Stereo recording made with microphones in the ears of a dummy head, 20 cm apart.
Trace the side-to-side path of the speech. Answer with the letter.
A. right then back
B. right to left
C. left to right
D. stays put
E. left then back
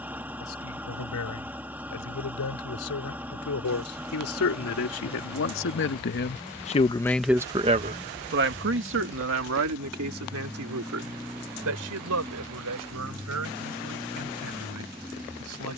C.